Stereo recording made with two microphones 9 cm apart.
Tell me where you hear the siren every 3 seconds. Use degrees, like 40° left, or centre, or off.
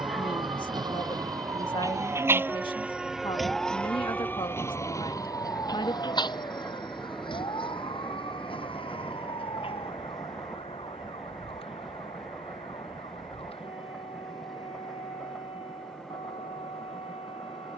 40° right, 20° left, 60° left, 70° left, 80° left, 80° left.